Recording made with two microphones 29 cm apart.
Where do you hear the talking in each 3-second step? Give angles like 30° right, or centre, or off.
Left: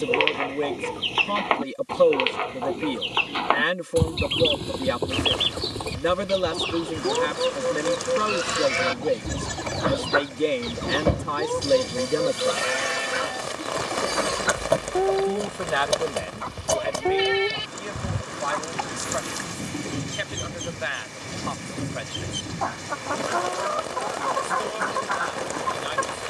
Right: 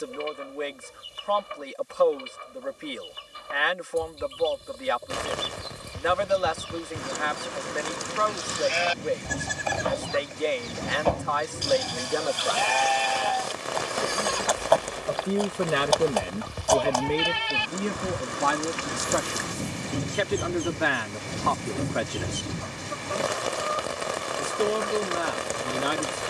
40° left, 40° left, 40° left, 40° left, 30° left, 40° right, 70° right, 70° right, 70° right.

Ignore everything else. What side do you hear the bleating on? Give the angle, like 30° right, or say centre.
20° left.